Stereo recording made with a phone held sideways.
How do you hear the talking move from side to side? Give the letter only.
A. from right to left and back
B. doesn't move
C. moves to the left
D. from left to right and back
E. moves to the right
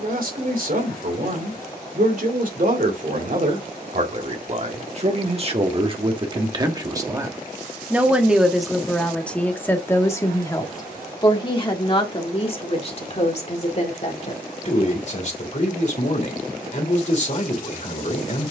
C.